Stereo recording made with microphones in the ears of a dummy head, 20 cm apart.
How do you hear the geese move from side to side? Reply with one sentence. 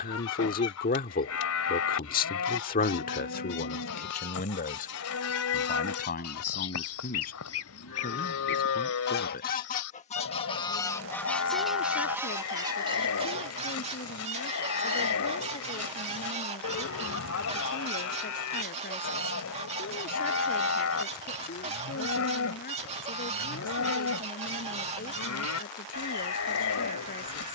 You can hear the geese travel towards the right.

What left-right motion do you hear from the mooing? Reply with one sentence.
You can hear the mooing stay in one place.